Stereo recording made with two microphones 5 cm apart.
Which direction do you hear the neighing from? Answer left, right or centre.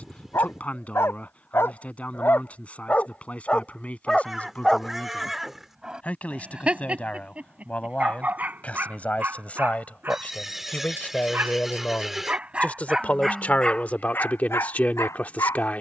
centre.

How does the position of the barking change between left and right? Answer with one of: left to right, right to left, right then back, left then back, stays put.
right then back.